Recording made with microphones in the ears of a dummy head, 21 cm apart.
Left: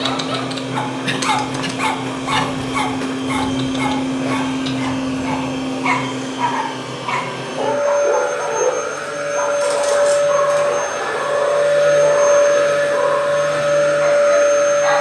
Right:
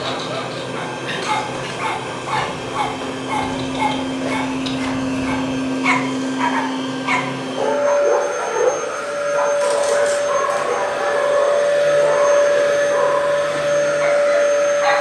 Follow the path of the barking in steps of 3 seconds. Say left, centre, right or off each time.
left, centre, right, right, right.